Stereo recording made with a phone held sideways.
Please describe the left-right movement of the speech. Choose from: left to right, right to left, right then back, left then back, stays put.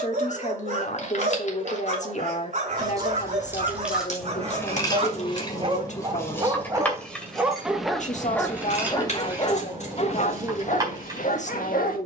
stays put.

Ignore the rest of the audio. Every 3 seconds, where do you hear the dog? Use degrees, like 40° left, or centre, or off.
50° right, 40° right, centre, 50° left.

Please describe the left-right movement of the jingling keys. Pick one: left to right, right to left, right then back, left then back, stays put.
left then back.